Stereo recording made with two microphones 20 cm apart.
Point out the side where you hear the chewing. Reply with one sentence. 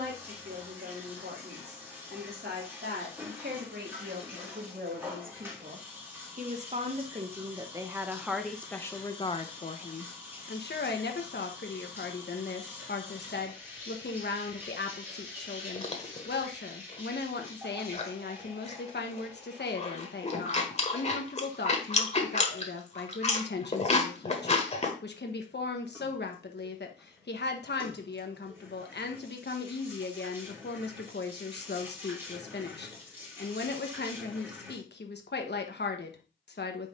In this clip you hear the chewing on the left.